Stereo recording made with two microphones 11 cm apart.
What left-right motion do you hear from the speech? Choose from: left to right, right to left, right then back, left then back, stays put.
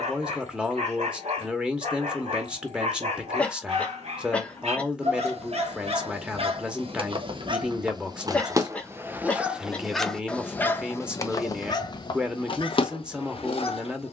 stays put.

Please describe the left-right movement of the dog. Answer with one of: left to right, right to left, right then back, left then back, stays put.
right to left.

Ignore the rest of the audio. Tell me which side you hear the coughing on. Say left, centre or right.
centre.